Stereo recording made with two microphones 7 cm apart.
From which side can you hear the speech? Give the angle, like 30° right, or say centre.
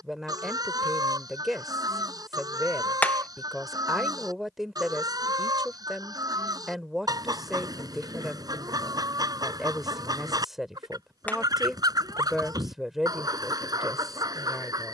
centre.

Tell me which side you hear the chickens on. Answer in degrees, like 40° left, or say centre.
60° right.